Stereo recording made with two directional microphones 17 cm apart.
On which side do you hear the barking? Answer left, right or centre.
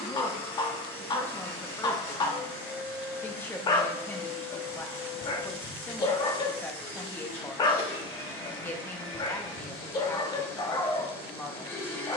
left.